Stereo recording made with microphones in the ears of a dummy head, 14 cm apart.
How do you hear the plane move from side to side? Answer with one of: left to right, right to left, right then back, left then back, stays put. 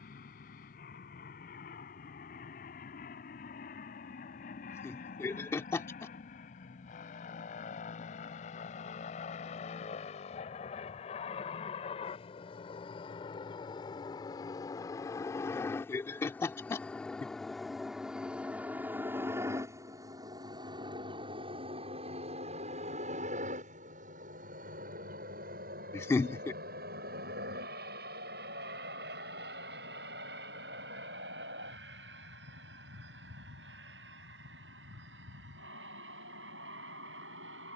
left to right.